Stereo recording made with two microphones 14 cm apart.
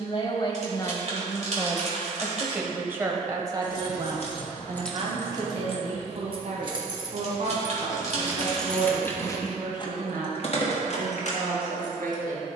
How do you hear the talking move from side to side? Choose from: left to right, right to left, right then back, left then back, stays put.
left to right.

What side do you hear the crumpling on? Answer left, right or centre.
right.